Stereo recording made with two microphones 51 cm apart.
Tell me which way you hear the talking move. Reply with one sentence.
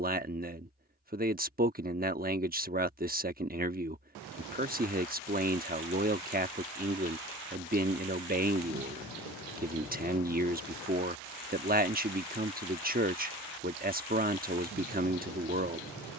In this clip you hear the talking stay put.